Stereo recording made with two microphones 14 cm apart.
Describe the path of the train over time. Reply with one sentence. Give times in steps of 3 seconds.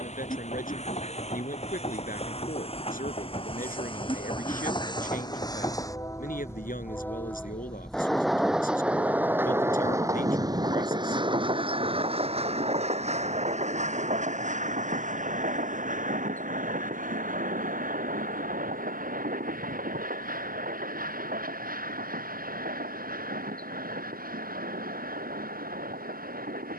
In this clip you hear the train on the left from 0 s, in the centre from 6 s and on the right from 9 s.